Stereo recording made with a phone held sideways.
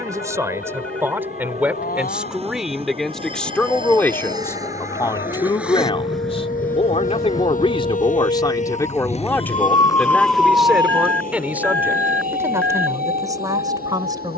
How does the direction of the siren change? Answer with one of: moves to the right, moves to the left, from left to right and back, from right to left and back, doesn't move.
moves to the right.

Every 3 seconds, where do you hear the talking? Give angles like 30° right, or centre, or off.
10° right, 20° left, 30° left, centre, 20° right.